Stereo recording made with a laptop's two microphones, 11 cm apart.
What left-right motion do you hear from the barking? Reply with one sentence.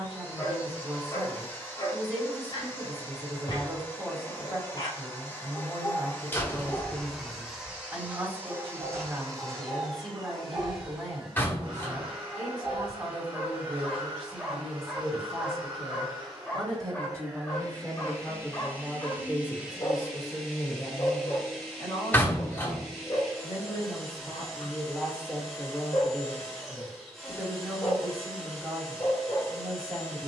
In this clip you hear the barking go right and come back.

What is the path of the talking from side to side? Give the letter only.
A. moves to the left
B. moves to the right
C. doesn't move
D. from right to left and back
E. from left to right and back
D.